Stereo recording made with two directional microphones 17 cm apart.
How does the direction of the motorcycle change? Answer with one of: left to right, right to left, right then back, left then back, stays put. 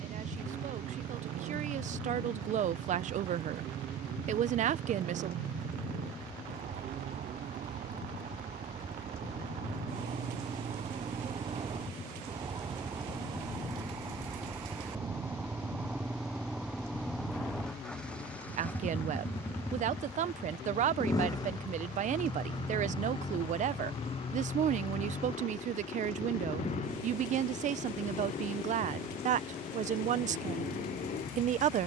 right to left.